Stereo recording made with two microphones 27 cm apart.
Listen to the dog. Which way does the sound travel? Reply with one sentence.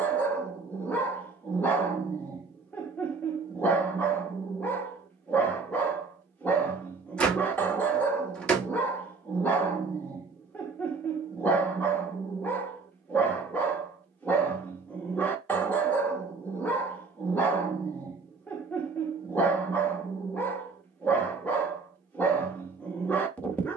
You can hear the dog stay put.